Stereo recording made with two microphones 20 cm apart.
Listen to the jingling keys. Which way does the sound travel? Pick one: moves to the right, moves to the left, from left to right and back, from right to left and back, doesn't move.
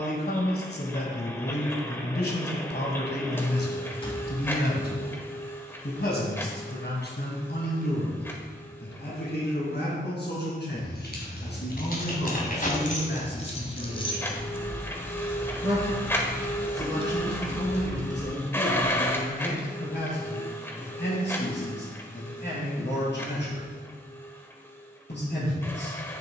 moves to the right.